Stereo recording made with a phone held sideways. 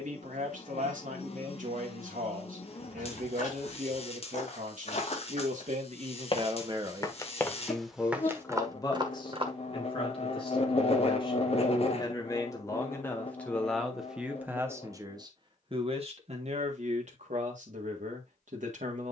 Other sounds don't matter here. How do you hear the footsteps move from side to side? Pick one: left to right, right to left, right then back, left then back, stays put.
left to right.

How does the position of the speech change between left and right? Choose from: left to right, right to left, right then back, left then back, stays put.
left then back.